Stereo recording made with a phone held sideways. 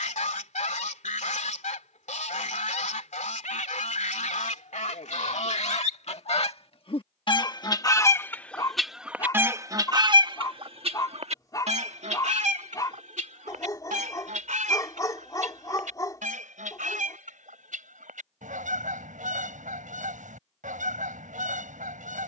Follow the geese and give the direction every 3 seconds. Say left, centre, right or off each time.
left, left, left, right, right, right, right, right.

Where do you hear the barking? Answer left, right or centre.
left.